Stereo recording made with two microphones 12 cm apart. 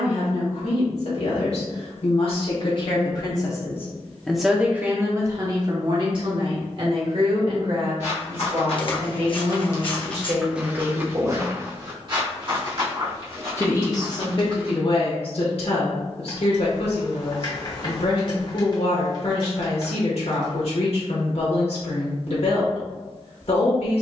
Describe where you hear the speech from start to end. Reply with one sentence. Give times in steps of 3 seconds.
In this clip you hear the speech on the left from 0 s, in the centre from 3 s, on the right from 6 s and on the left from 12 s.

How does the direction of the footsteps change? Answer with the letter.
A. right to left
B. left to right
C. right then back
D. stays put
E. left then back
B.